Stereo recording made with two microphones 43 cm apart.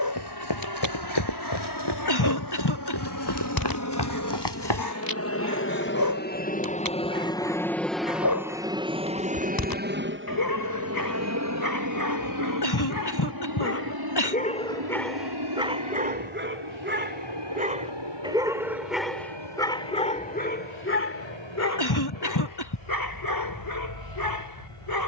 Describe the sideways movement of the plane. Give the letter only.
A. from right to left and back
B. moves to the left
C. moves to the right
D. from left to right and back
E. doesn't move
C.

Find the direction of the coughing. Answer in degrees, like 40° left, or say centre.
60° left.